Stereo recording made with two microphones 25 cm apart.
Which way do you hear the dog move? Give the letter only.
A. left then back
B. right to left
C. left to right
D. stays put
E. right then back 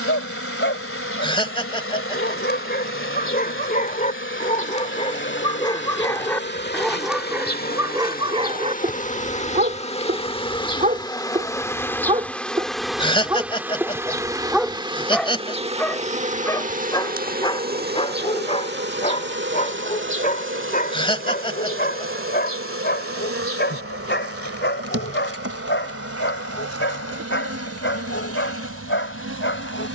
E.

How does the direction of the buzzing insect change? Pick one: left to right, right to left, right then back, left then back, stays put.
left to right.